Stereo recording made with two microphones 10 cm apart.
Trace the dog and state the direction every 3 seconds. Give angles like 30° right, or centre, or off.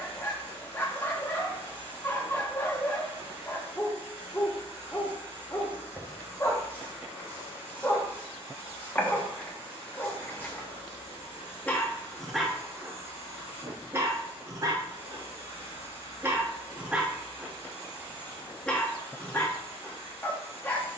20° left, 20° left, 20° left, 20° left, 20° right, 20° right, 10° left.